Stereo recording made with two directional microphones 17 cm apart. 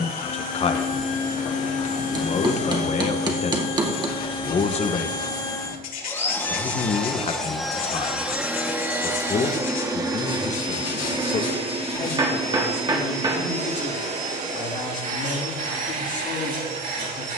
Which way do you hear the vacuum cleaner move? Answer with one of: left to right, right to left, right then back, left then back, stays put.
left to right.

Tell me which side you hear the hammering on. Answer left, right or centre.
right.